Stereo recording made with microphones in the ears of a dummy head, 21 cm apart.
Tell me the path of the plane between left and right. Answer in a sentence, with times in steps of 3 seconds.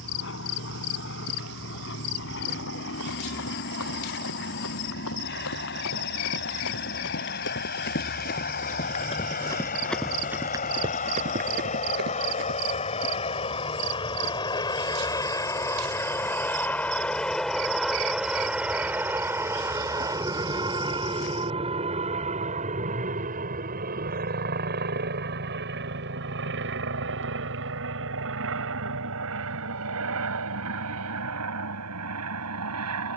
You can hear the plane on the left from 0 s, in the centre from 15 s and on the right from 21 s.